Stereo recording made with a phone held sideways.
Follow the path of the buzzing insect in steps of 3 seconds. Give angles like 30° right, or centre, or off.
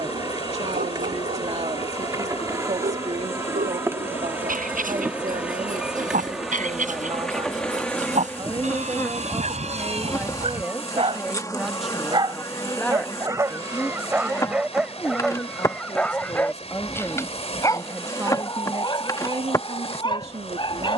30° right, 10° right, centre, 20° left, 20° left, 20° left, 20° left.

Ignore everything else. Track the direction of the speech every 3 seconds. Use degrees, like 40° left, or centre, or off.
50° right, 50° right, 40° right, 10° right, 10° left, 20° left, 40° right.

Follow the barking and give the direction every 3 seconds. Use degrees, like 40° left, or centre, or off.
70° right, 70° right, 60° right, 50° right, 20° right, 10° left, 30° left.